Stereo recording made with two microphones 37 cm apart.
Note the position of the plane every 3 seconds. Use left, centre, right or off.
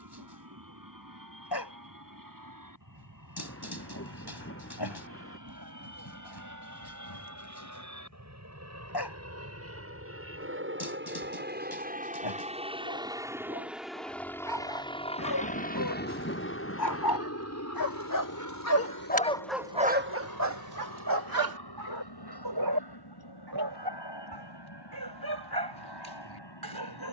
right, right, right, right, centre, left, left, left, left.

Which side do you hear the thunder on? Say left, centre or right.
left.